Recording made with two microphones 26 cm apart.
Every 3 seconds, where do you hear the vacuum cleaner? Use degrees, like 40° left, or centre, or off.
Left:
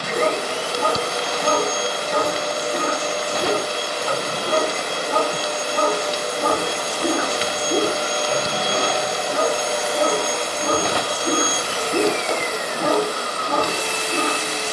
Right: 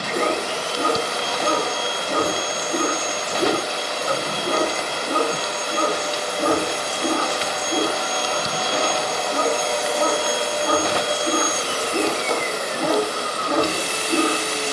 50° left, 50° left, 30° left, 10° right, 30° right.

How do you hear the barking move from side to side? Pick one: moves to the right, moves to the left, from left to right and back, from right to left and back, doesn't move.
from right to left and back.